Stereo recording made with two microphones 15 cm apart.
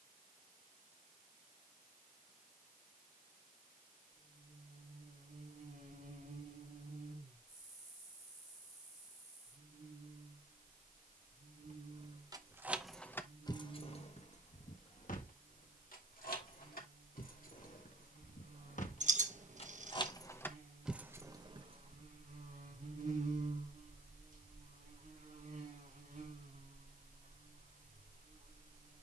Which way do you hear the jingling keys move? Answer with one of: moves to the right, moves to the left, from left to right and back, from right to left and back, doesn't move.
from right to left and back.